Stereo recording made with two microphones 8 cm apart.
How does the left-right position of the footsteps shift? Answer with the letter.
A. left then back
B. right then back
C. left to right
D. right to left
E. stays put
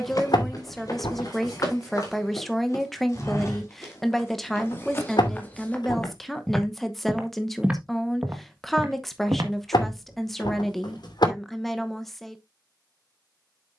C.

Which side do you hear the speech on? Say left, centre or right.
centre.